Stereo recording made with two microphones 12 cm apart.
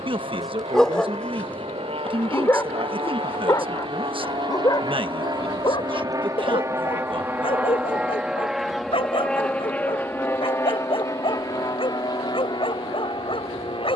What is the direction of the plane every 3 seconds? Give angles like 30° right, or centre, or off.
60° right, 40° right, 10° right, 20° left, 40° left.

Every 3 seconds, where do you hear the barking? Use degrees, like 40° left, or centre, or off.
10° left, 30° left, 50° left, 50° left, 50° left.